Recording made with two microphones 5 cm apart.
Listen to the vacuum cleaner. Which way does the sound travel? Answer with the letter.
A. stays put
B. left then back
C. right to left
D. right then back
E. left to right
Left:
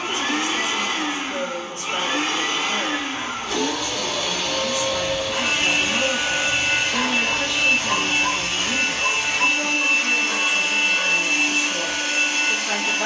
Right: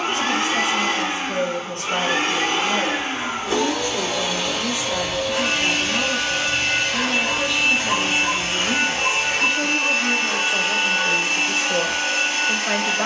B.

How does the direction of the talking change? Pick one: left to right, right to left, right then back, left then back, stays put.
left then back.